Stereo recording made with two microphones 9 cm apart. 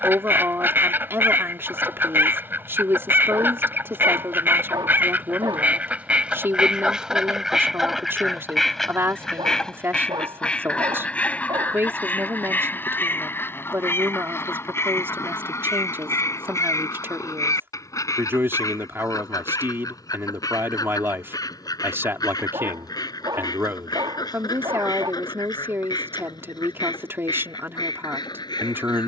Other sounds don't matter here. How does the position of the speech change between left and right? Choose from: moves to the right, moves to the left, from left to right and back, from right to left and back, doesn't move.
doesn't move.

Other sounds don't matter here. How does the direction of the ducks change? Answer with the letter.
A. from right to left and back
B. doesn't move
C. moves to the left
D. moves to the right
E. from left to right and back
C.